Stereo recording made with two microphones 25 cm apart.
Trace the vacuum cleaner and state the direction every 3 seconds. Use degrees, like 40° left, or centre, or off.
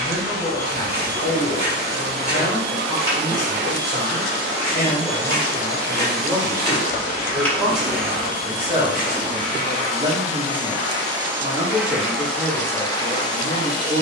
40° right, 40° right, 40° right, 20° right, 10° left.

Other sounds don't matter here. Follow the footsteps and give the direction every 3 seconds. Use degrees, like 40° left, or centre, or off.
30° right, centre, centre, 30° right, off.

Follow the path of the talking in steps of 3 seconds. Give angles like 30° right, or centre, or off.
20° left, 10° left, 10° right, 40° right, 40° right.